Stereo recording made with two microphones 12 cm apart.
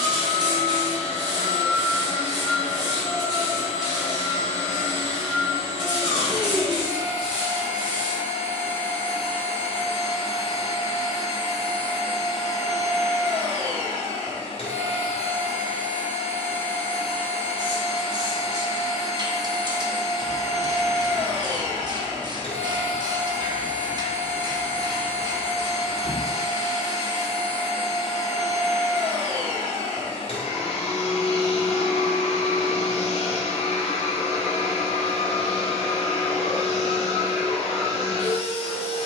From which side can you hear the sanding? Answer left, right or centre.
right.